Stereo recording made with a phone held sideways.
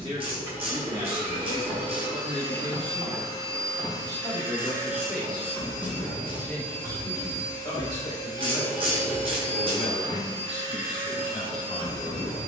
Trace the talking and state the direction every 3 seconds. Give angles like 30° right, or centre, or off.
30° right, 10° right, 20° left, 40° left.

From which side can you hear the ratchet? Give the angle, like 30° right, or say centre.
40° right.